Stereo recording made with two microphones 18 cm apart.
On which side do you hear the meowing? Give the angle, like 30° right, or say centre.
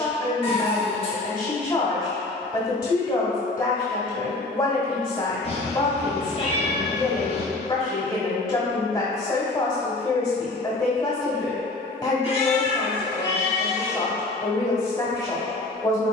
30° left.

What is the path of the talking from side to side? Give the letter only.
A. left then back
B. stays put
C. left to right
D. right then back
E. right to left
B.